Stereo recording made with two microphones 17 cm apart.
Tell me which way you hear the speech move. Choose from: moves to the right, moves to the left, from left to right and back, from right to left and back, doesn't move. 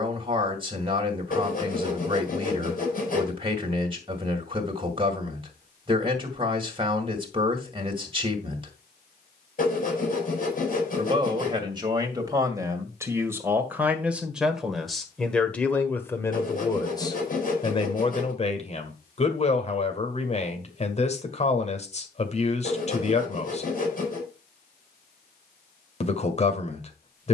moves to the left.